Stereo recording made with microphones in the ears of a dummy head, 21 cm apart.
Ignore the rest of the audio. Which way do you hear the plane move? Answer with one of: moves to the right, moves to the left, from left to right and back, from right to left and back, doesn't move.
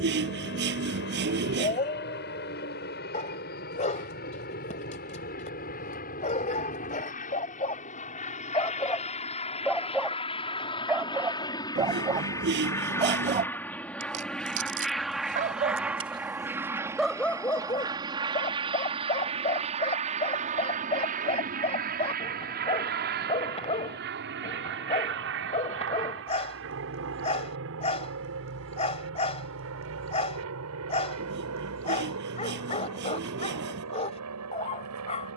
moves to the right.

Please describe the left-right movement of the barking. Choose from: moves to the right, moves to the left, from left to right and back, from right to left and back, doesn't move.
from left to right and back.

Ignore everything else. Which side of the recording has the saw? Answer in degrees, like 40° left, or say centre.
50° right.